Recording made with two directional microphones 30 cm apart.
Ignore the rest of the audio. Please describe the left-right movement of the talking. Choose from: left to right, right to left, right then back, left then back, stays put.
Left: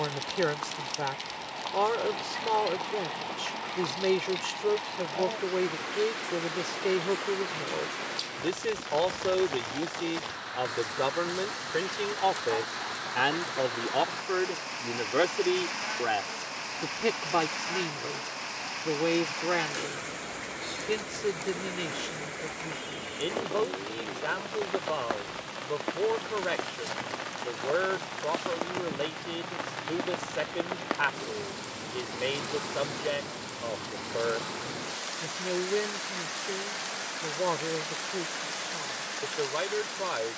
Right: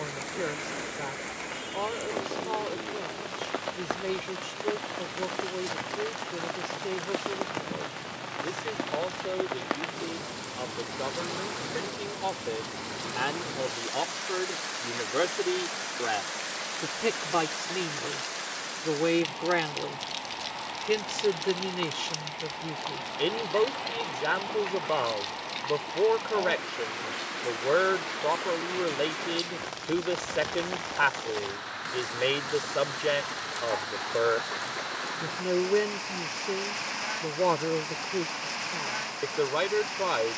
left to right.